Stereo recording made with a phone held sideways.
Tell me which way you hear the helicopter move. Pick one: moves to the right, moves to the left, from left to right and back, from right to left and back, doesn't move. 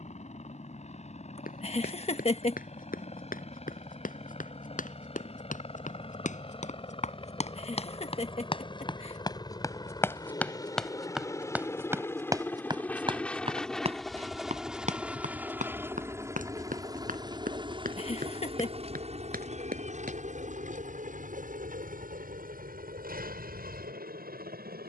moves to the right.